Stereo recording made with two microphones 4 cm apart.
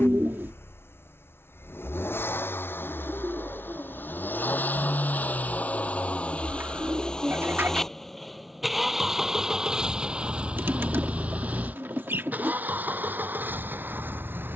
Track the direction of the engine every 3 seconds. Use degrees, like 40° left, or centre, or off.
60° left, 50° left, 10° left, 20° right, 50° right.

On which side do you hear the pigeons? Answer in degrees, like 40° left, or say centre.
60° right.